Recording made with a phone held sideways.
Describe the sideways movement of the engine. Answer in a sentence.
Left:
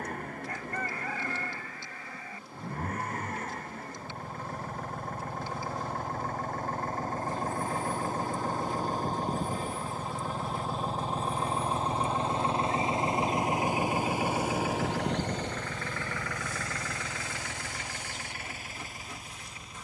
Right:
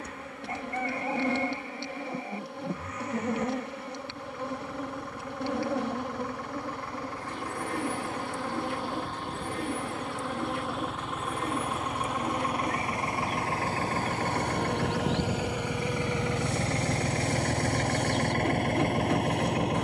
In this clip you hear the engine travel towards the right.